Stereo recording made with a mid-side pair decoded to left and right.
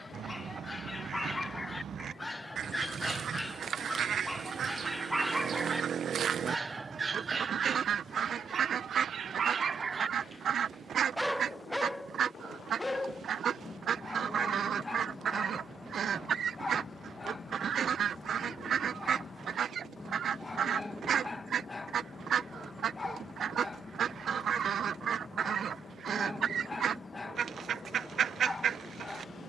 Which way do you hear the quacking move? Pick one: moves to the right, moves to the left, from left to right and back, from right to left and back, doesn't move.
doesn't move.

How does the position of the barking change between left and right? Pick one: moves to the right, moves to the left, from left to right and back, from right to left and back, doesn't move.
from left to right and back.